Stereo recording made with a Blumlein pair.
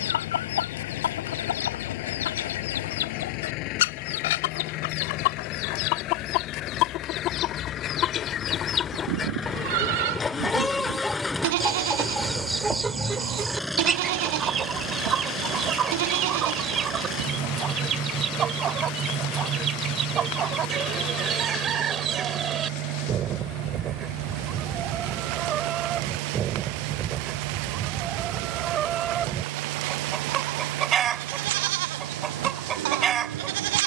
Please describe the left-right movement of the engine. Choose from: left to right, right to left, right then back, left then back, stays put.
left to right.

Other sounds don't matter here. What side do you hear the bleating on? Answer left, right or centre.
right.